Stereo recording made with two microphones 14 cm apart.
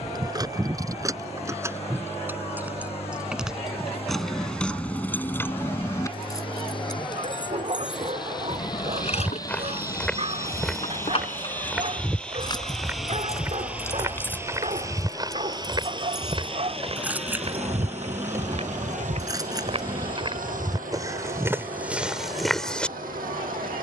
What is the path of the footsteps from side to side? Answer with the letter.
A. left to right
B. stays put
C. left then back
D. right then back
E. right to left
D.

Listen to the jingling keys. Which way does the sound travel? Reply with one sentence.
You can hear the jingling keys move from right to left and back again.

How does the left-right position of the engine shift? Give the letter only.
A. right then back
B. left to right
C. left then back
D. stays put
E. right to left
B.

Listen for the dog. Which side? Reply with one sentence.
You can hear the dog on the right.